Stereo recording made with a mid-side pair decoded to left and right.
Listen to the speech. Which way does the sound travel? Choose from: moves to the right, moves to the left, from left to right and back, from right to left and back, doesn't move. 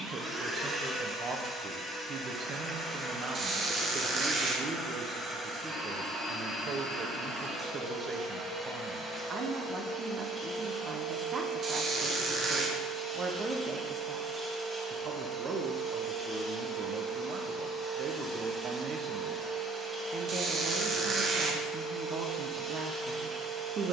doesn't move.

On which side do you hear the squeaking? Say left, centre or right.
right.